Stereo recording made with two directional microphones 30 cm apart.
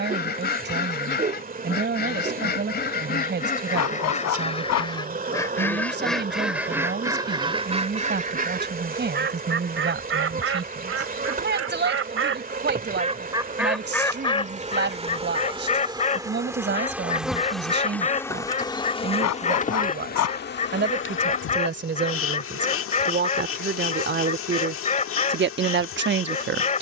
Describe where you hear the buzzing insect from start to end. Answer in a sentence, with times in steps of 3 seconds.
You can hear the buzzing insect on the right from 0 s, in the centre from 15 s and on the left from 18 s.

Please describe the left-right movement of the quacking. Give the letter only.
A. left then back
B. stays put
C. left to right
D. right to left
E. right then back
E.